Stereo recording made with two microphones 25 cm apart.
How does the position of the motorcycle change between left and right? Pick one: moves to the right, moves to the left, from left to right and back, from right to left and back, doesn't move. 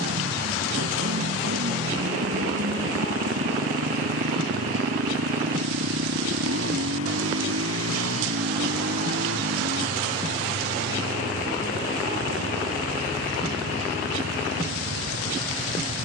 doesn't move.